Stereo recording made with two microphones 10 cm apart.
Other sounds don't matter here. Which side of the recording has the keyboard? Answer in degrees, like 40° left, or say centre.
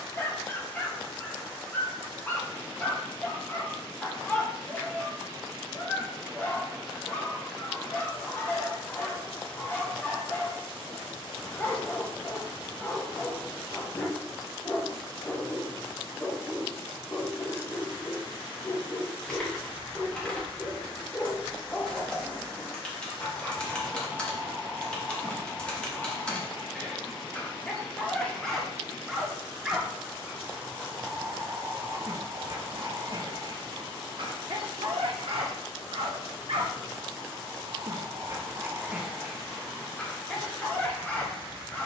10° left.